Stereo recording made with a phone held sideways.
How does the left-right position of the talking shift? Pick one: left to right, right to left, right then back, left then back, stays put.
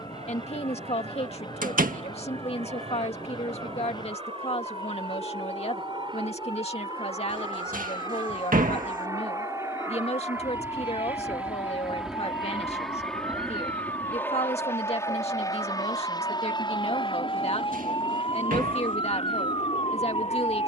stays put.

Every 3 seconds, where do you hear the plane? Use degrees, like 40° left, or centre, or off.
50° right, 40° right, 30° right, 20° right, 10° left, 30° left, 50° left.